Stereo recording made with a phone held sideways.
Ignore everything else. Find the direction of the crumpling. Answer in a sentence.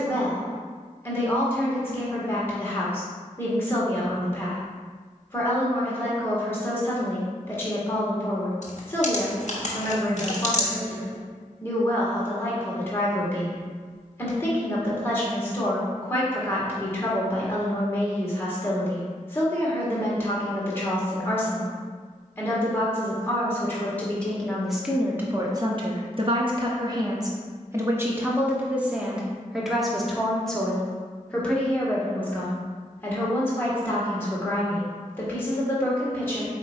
In this clip you hear the crumpling on the left.